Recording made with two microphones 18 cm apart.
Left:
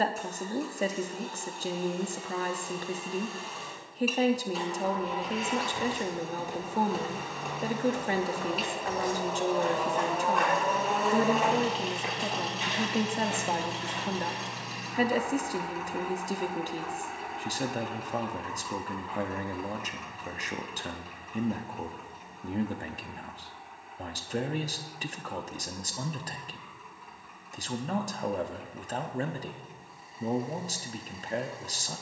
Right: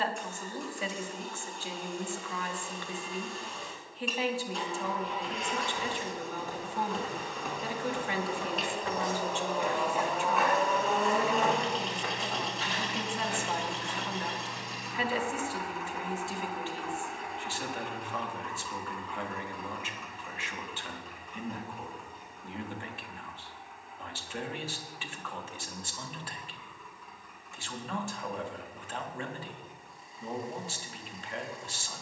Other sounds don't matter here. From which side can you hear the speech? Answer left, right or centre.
left.